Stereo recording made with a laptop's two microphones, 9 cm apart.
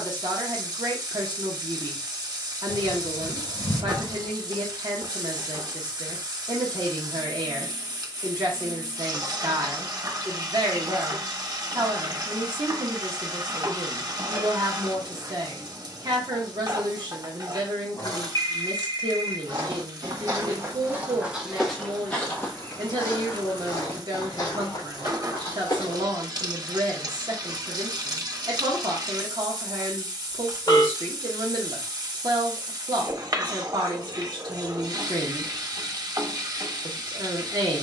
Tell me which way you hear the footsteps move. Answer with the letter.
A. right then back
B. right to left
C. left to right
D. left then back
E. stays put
B.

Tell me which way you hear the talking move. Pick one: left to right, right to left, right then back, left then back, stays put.
stays put.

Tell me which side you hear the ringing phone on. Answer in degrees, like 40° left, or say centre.
50° left.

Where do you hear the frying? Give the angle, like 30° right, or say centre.
50° right.